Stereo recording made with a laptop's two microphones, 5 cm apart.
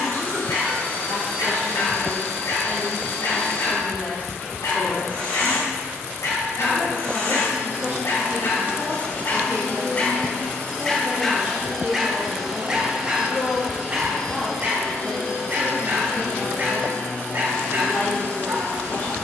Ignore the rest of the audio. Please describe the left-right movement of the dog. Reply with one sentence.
In this clip you hear the dog go from the left side to the right.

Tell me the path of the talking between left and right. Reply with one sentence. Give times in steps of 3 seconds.
You can hear the talking on the left from 0 s, in the centre from 6 s, on the right from 9 s, in the centre from 12 s and on the left from 15 s.